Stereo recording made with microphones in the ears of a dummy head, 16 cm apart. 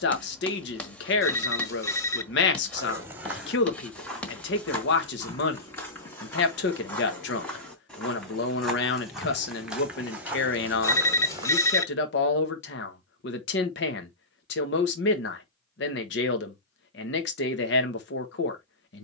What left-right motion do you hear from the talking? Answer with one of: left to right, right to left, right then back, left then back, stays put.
stays put.